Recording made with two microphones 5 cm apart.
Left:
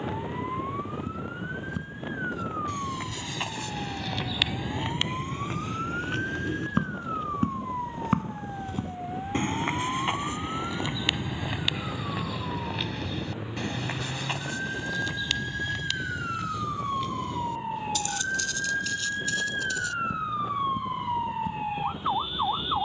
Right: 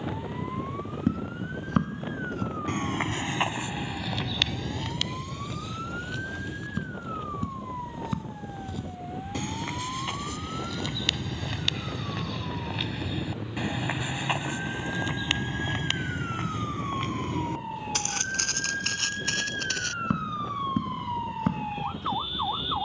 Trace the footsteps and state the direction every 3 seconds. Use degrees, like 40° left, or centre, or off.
60° right, 10° left, 40° left, 20° left, 10° right, 40° right, 60° right, 70° right.